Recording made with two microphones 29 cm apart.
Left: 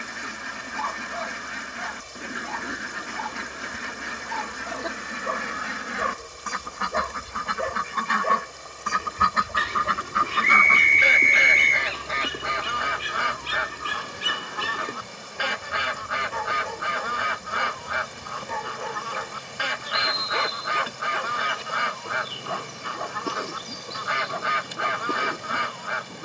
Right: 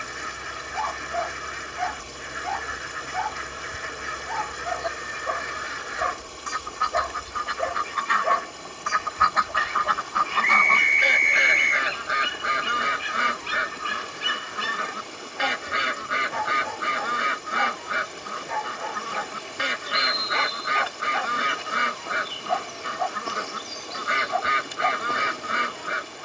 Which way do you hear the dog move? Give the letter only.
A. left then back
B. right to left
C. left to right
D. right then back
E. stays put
E.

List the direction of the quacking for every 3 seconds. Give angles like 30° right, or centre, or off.
70° left, 70° left, 60° left, 20° left, 20° right, 20° right, 20° right, 20° right, 20° right.